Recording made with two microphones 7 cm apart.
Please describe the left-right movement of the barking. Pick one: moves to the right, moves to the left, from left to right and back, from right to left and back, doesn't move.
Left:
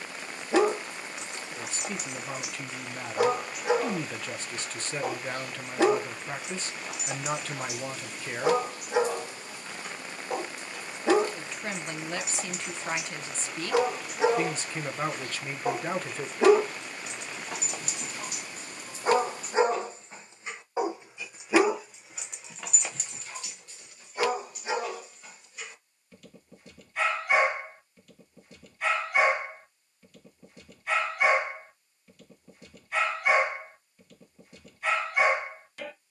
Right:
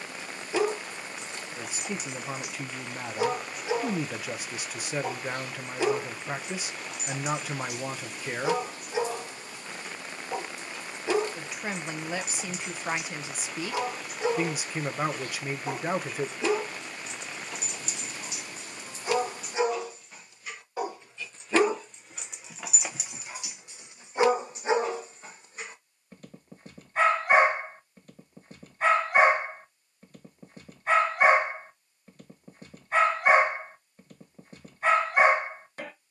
moves to the right.